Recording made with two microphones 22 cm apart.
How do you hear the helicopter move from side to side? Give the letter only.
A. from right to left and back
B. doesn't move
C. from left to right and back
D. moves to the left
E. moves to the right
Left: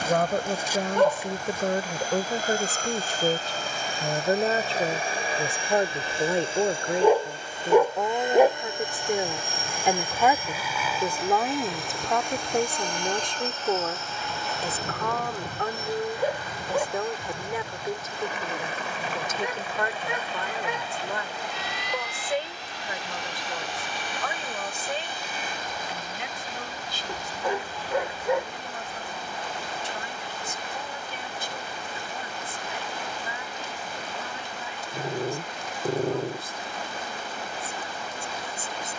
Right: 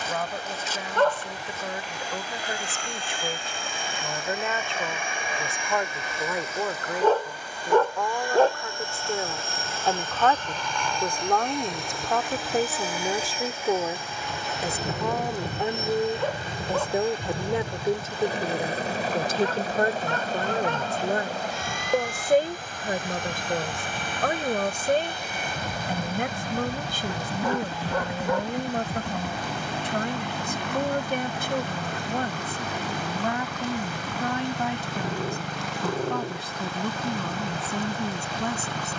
E.